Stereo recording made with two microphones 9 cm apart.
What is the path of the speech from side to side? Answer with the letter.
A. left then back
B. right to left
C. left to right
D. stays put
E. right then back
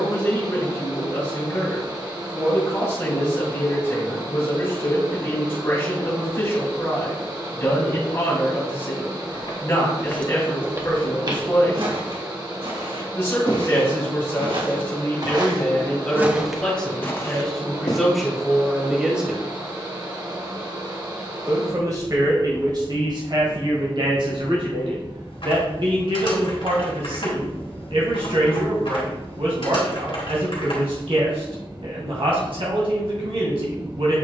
C.